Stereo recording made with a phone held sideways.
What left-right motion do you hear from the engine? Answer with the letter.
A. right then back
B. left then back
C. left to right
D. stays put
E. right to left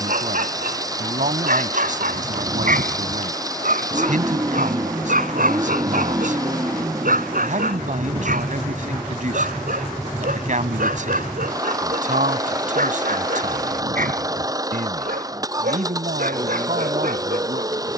D.